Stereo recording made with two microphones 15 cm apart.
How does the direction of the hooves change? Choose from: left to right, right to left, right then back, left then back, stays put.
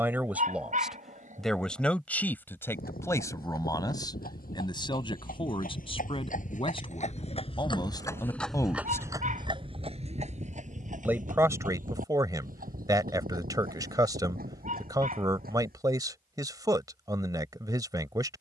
left to right.